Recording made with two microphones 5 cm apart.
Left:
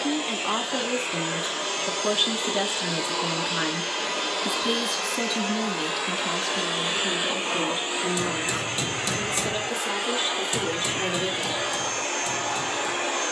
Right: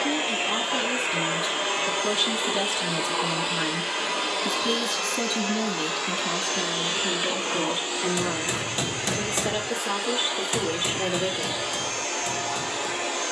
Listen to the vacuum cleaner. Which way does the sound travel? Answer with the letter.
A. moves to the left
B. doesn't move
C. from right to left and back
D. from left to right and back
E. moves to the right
A.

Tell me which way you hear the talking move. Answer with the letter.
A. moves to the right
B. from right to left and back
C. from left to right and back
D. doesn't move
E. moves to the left
A.